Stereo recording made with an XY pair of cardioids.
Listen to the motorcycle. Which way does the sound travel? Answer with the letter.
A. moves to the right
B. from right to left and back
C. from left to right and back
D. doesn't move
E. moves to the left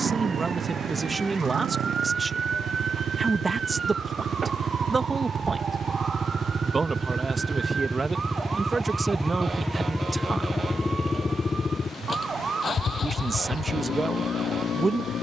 E.